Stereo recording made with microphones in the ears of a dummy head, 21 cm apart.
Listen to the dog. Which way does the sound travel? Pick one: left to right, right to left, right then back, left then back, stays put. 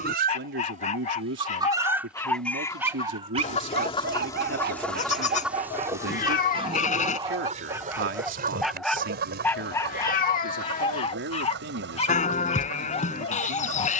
right then back.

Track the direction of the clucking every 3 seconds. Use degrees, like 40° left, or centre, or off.
10° right, 10° left, 30° right, 50° right, 50° right.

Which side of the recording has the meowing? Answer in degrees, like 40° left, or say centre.
30° left.